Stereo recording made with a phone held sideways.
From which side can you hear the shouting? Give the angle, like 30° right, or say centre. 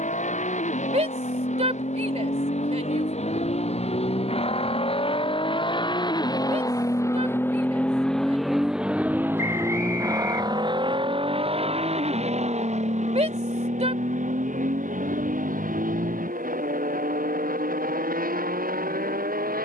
50° right.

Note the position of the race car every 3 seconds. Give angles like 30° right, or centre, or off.
60° left, 50° left, 10° left, 30° right, 50° right, 70° right, 70° right.